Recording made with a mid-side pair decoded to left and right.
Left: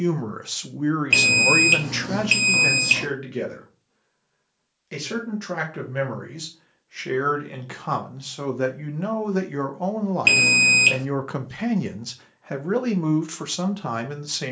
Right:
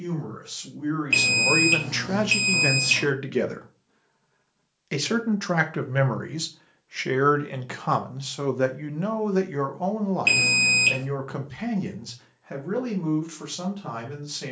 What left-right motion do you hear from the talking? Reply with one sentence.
You can hear the talking go right and come back.